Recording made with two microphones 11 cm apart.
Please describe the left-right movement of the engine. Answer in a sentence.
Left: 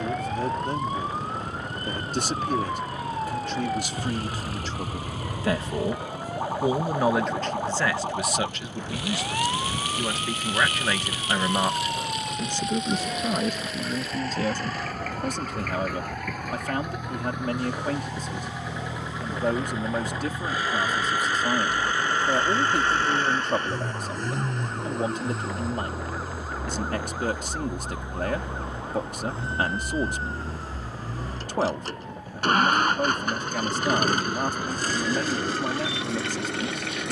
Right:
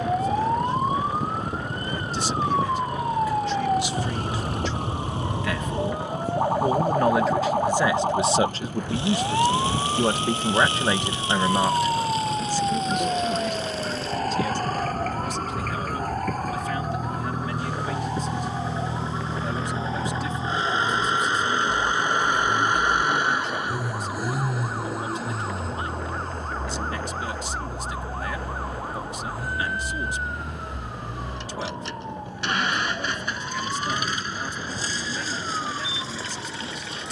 In this clip you hear the engine move to the left.